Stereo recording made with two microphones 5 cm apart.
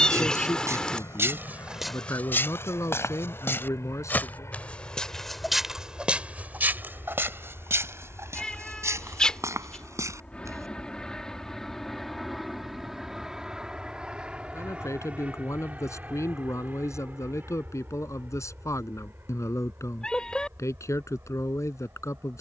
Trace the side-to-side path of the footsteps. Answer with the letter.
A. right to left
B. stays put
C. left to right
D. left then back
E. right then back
D.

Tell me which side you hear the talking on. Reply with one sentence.
In this clip you hear the talking on the left.